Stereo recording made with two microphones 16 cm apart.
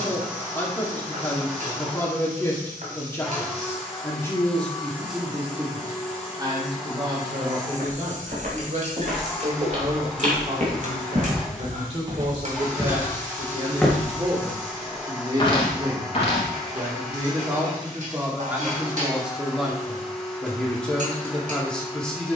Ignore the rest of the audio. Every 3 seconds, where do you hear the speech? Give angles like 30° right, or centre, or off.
20° left, centre, 40° right, 50° right, 40° right, 20° right, centre, 10° left.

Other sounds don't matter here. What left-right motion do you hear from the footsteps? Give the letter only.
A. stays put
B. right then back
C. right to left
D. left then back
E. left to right
C.